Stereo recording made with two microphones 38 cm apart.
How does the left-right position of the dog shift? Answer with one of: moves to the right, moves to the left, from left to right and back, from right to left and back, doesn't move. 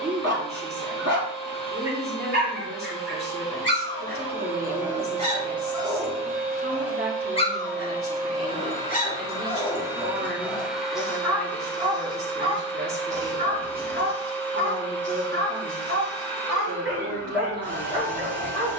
from right to left and back.